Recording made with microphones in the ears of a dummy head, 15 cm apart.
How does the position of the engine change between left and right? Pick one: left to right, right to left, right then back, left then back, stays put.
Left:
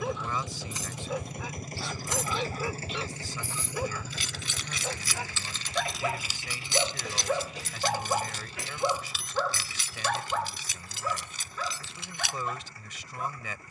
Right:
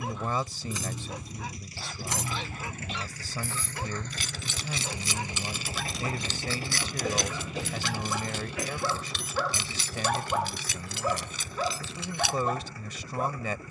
left to right.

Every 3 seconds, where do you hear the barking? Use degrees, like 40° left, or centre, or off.
80° left, 70° left, 40° left, 10° right, 40° right.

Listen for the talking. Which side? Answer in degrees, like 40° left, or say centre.
30° right.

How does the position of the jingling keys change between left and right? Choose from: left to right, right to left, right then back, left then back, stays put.
left then back.